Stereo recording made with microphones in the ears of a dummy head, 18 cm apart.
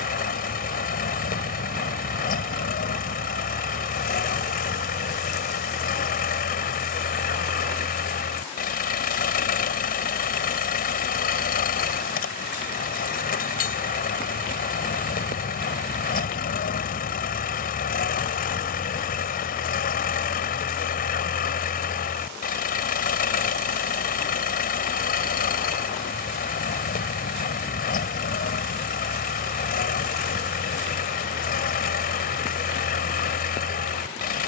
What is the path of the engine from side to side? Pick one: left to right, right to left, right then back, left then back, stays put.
stays put.